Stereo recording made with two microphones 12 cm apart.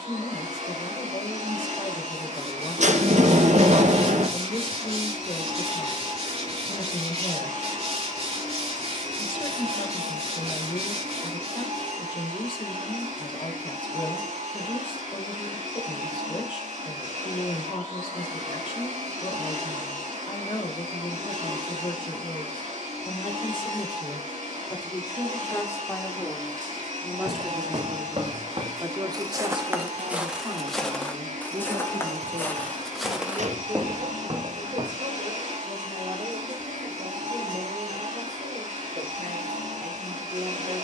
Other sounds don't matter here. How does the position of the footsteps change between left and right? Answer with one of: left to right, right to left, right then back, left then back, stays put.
left then back.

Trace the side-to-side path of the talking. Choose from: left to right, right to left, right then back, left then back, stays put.
left to right.